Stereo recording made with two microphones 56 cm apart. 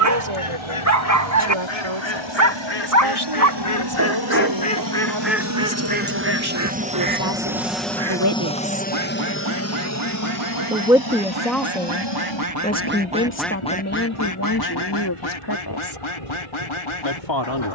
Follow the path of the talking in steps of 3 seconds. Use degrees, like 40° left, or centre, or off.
60° right, 50° right, 40° right, centre, 20° left, 50° left.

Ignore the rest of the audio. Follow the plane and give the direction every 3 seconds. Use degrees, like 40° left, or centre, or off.
60° right, 40° right, centre, 30° left, 50° left, 60° left.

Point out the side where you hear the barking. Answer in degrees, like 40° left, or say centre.
30° right.